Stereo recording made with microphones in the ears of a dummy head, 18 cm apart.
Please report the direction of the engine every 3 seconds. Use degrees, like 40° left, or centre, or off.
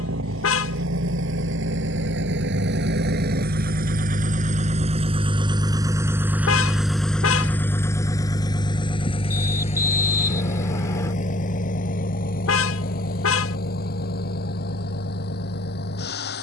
70° right, 40° right, 10° left, 40° left, 50° left, 60° left.